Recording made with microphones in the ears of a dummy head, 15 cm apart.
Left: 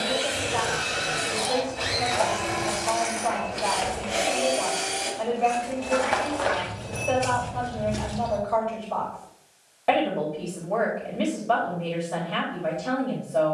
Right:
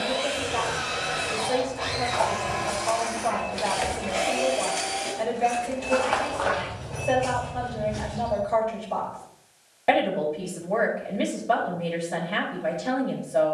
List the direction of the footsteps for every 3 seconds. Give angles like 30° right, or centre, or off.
40° left, 10° right, 40° left, off, off.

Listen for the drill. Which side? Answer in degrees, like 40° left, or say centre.
70° left.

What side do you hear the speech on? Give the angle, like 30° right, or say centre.
10° right.